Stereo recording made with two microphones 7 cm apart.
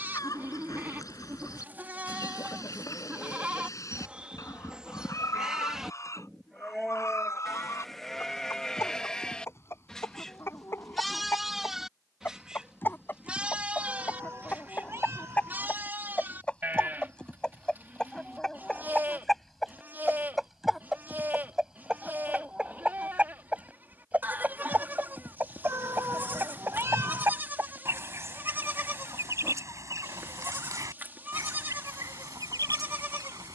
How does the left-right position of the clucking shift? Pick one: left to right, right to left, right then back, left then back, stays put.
left to right.